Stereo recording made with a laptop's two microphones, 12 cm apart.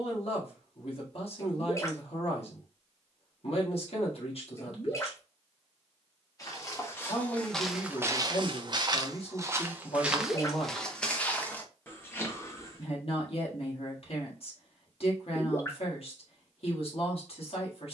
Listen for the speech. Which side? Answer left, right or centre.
left.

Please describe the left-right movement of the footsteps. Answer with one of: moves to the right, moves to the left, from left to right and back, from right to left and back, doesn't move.
from left to right and back.